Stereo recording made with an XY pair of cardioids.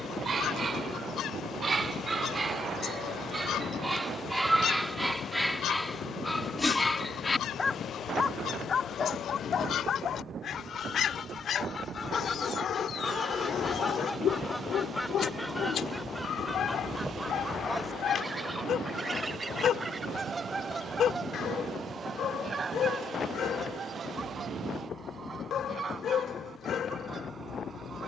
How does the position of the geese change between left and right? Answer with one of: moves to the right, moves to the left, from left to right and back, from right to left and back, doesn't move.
moves to the right.